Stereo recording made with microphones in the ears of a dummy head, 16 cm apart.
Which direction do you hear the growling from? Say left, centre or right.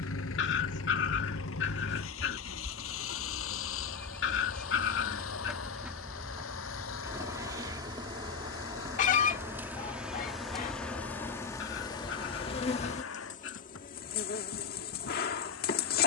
left.